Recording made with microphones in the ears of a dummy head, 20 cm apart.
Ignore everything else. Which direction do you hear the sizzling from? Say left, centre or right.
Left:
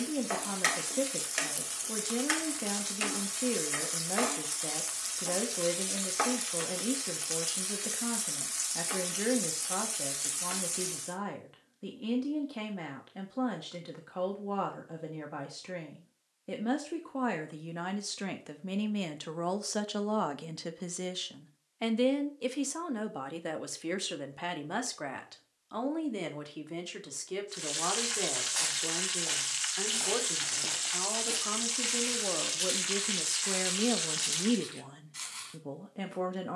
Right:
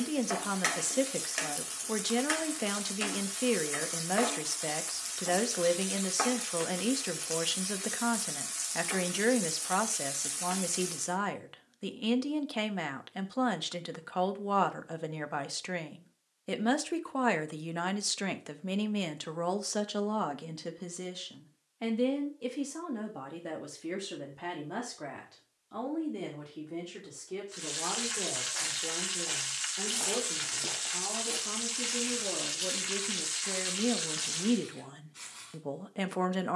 centre.